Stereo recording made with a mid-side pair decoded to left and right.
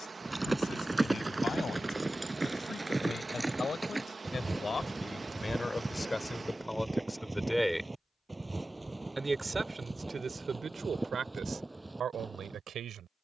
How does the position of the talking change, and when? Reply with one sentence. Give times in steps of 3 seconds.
In this clip you hear the talking on the left from 0 s, in the centre from 6 s and on the right from 9 s.